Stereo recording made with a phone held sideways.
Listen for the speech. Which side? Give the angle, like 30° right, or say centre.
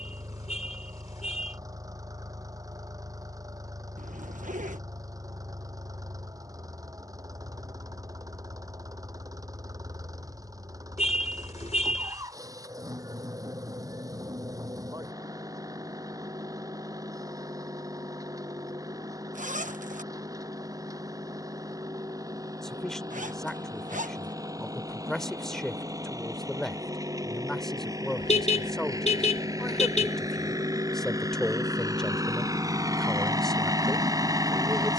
centre.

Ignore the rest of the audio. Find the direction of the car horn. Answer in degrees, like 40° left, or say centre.
60° left.